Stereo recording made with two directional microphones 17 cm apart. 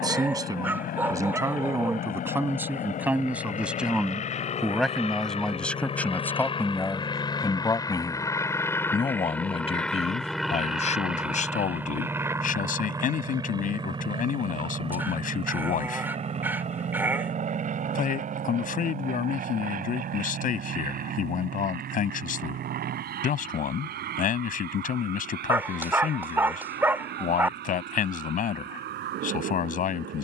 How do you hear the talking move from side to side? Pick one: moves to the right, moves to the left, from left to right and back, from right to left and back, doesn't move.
moves to the left.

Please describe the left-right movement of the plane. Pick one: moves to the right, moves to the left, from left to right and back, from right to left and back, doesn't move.
moves to the right.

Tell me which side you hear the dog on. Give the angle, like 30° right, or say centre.
10° right.